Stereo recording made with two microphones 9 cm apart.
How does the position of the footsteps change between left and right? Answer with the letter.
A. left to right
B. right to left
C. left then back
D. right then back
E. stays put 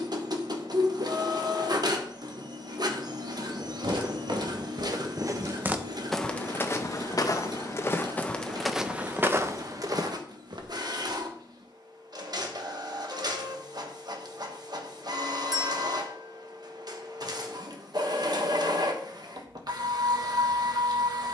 C.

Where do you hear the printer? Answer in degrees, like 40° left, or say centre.
50° right.